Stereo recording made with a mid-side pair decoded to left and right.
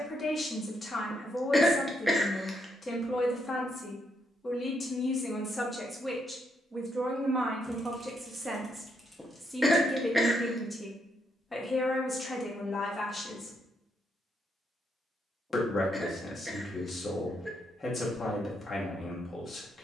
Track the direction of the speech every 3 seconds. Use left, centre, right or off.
left, left, right, centre, left, left, left.